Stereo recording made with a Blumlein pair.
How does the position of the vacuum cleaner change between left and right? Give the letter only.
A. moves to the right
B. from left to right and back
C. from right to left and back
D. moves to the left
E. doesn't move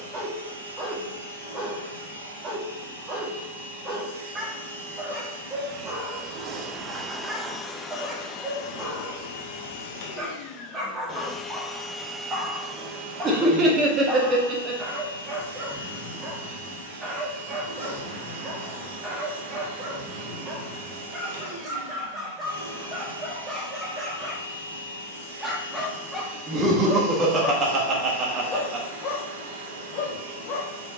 C.